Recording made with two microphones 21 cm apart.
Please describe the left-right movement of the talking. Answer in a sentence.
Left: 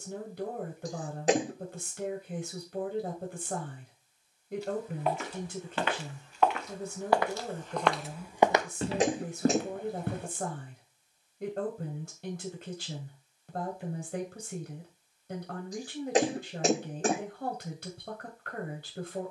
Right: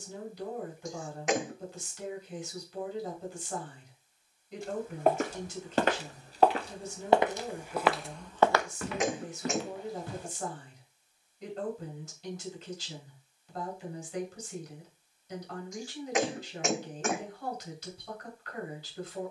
You can hear the talking stay in one place.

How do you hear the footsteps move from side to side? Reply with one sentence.
In this clip you hear the footsteps move from right to left.